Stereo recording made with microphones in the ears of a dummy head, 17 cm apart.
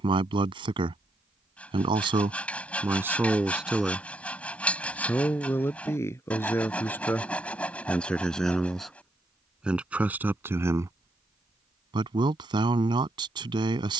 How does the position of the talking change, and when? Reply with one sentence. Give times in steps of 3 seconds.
You can hear the talking on the right from 0 s, in the centre from 3 s and on the right from 12 s.